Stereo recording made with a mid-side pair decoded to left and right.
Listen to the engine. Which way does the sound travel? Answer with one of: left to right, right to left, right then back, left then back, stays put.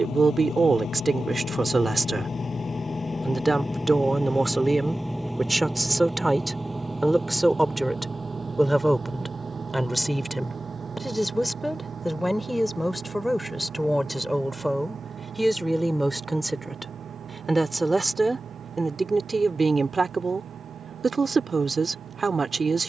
left to right.